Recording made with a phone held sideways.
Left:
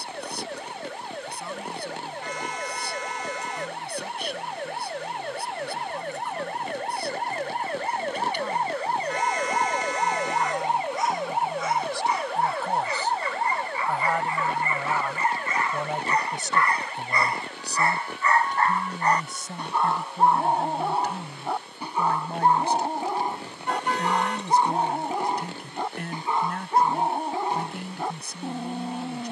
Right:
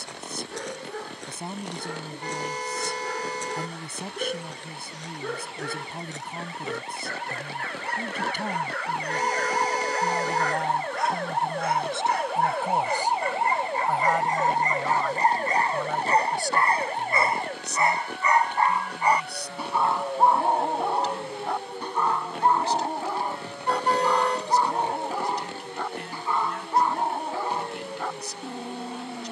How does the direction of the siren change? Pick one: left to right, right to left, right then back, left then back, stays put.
left to right.